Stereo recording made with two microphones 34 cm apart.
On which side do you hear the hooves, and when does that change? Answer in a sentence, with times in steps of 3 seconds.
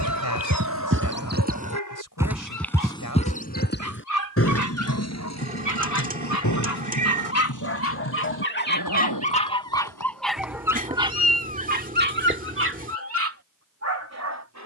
You can hear the hooves on the right from 0 s, on the left from 3 s and not at all from 12 s.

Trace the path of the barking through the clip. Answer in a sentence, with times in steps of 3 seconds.
You can hear the barking on the left from 0 s, in the centre from 9 s and on the right from 12 s.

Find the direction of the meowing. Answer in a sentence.
In this clip you hear the meowing on the right.